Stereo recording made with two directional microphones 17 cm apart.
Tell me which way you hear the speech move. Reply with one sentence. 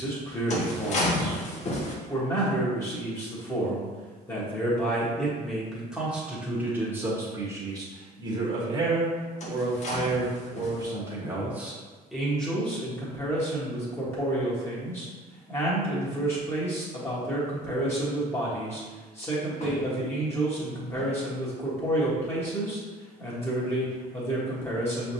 You can hear the speech go right and come back.